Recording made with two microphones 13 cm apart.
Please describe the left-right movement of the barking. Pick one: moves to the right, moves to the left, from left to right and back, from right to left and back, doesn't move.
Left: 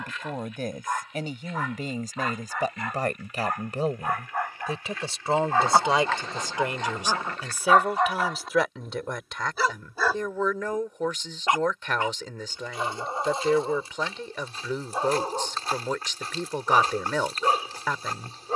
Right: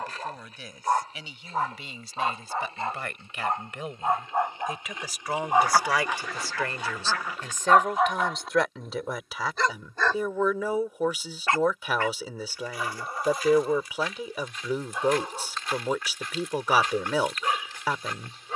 moves to the left.